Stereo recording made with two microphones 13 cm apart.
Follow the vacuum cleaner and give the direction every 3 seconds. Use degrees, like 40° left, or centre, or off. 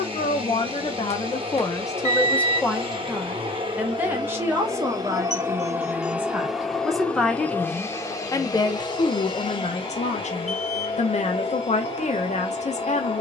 40° right, 30° right, 10° left, 40° left, 40° left.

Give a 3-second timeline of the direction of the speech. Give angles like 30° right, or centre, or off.
30° left, 20° right, 10° left, 60° left, 60° left.